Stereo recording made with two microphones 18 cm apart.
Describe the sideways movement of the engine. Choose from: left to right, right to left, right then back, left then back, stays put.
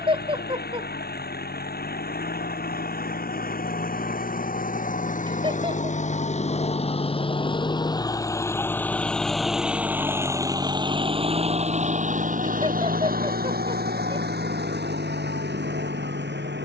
left to right.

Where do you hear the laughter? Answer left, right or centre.
right.